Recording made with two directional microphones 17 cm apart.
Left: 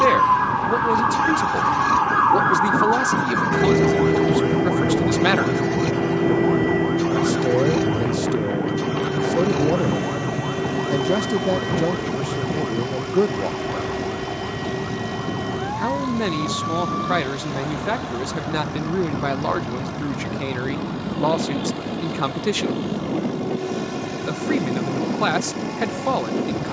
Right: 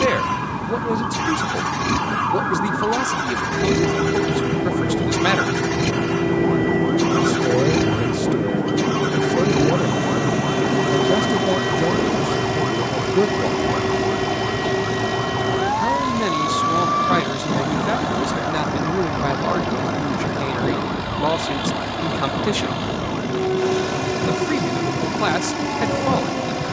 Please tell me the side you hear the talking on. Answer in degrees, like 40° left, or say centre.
centre.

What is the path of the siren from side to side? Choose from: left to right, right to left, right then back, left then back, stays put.
left to right.